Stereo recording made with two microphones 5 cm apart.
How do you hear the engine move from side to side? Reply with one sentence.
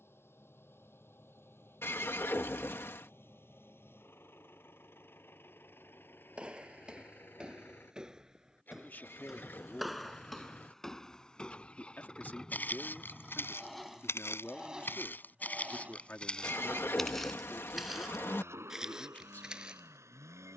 In this clip you hear the engine move from left to right.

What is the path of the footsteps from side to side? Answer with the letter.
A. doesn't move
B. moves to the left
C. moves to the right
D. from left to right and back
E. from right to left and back
E.